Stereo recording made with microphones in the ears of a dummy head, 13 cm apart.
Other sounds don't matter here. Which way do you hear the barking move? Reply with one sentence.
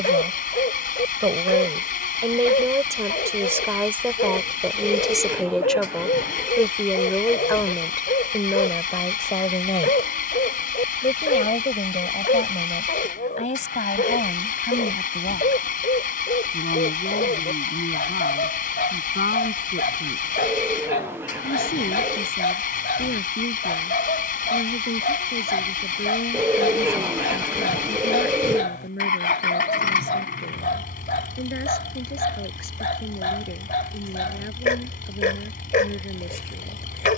In this clip you hear the barking stay in one place.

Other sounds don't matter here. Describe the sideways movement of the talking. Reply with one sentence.
You can hear the talking move to the left.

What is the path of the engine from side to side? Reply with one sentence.
In this clip you hear the engine stay put.